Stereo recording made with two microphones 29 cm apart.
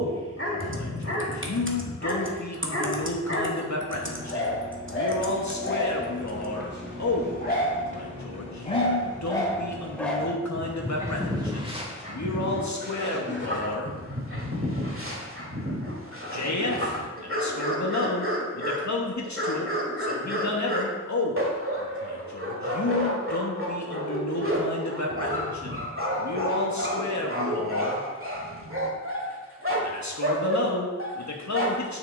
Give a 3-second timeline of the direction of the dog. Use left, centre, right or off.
left, left, left, centre, right, right, right, right, right, right, right.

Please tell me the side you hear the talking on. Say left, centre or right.
left.